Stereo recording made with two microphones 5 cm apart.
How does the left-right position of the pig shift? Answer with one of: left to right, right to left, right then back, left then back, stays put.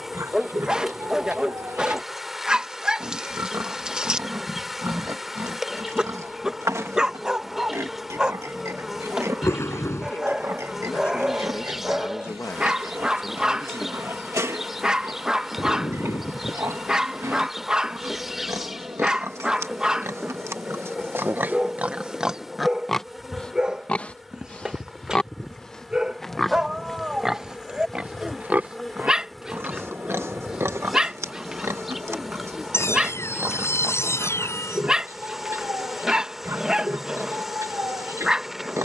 left then back.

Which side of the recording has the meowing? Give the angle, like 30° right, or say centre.
60° left.